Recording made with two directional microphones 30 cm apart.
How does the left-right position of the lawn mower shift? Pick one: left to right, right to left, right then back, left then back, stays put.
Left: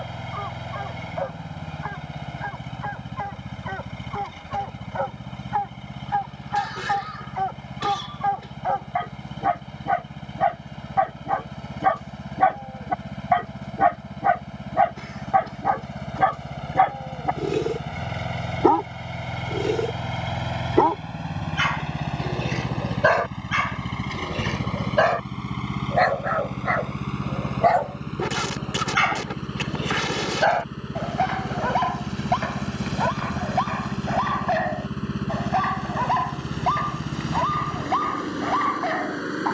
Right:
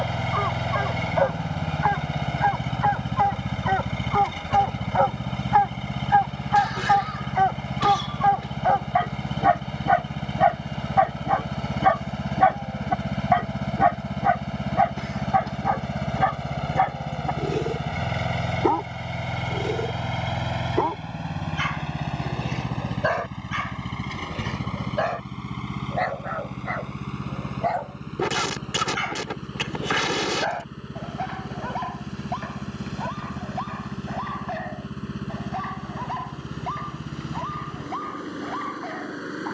right to left.